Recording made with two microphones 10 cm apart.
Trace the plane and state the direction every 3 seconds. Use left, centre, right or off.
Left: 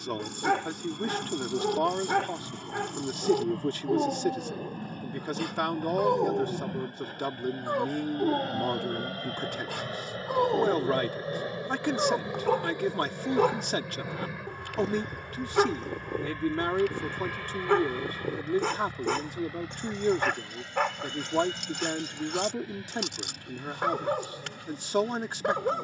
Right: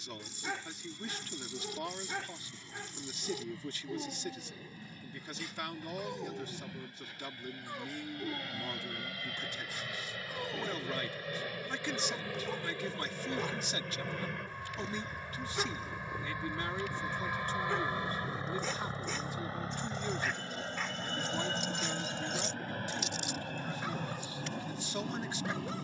left, left, left, left, centre, centre, right, right, right.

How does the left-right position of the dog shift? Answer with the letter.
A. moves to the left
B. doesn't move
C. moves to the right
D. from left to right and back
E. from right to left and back
B.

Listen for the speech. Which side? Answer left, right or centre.
left.